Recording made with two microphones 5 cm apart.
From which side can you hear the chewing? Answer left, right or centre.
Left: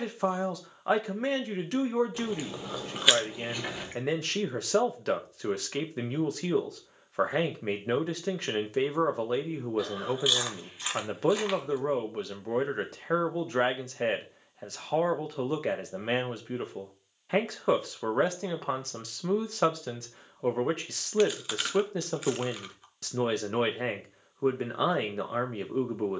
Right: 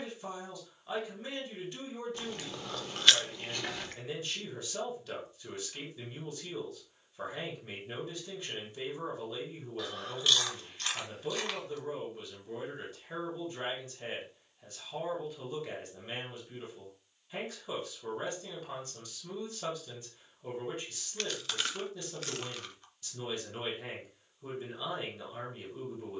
centre.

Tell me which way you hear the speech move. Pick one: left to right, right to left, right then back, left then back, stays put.
stays put.